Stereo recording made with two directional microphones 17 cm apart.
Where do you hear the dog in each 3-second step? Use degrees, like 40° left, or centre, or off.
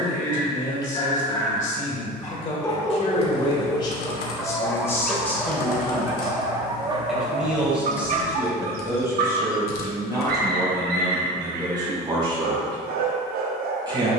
20° left, centre, 40° right, 70° right, 70° right.